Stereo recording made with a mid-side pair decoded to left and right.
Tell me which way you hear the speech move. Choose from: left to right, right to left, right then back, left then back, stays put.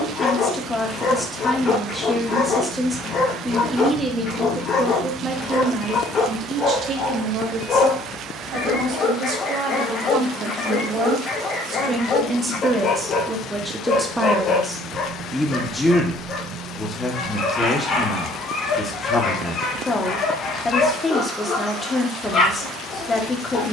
right then back.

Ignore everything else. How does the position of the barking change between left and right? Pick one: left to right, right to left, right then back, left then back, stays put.
stays put.